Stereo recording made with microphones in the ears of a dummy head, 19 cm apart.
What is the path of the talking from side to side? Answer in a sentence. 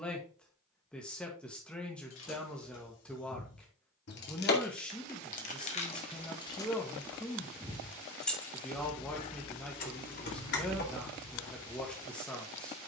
You can hear the talking stay in one place.